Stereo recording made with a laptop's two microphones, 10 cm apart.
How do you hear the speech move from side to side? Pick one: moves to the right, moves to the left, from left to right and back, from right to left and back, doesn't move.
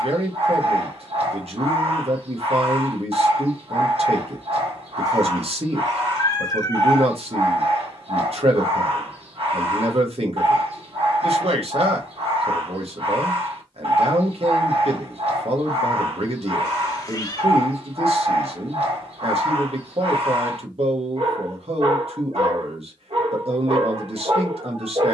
doesn't move.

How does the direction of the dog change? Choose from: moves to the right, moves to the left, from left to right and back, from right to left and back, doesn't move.
doesn't move.